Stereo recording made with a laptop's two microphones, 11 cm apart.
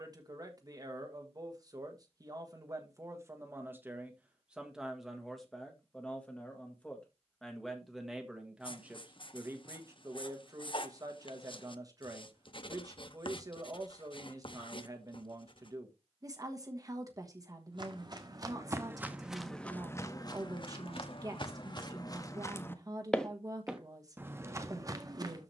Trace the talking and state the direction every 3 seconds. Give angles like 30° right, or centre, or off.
30° right, 10° right, centre, 30° right, 30° right, 30° right, 30° right, 30° right, 30° right.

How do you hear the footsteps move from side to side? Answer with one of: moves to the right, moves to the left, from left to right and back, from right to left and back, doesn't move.
from right to left and back.